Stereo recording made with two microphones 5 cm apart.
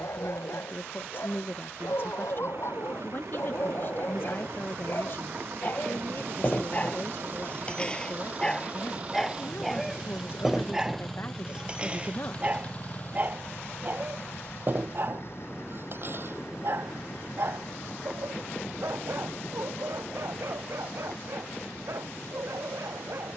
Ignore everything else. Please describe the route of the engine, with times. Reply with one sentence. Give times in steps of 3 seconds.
In this clip you hear the engine on the right from 0 s, in the centre from 9 s and on the left from 12 s.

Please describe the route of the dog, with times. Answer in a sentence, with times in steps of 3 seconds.
You can hear the dog on the left from 0 s, in the centre from 9 s and on the right from 12 s.